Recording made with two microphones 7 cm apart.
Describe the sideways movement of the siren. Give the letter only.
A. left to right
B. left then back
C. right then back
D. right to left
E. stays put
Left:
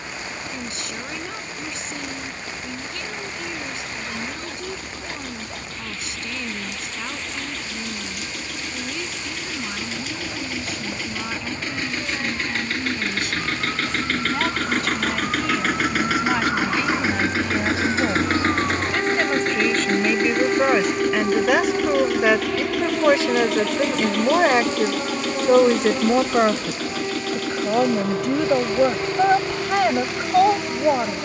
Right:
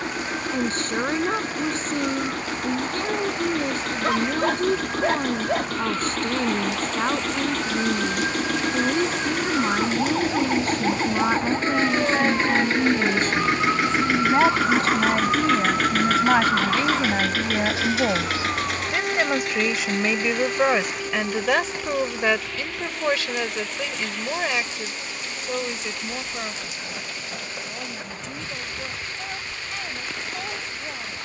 D.